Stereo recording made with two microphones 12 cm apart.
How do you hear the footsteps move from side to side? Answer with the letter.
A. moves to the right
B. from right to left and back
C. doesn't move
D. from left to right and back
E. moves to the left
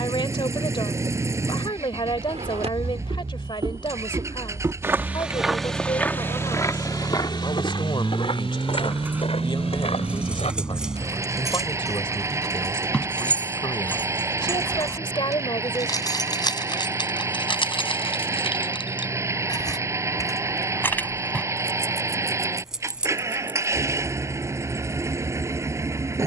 E.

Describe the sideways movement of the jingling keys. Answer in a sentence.
In this clip you hear the jingling keys go left and come back.